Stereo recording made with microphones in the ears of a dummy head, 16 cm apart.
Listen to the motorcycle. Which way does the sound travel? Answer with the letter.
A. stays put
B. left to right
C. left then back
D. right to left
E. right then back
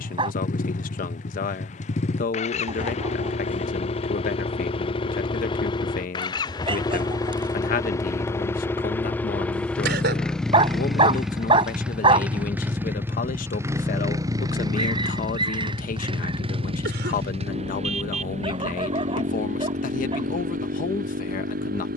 B.